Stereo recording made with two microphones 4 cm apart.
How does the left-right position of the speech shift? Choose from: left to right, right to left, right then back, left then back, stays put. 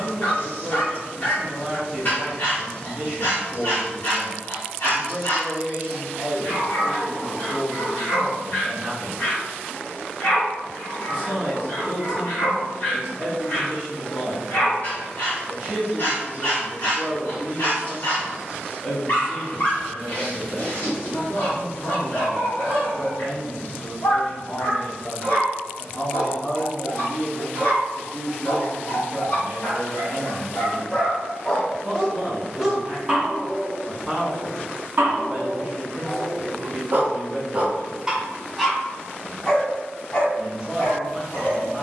left then back.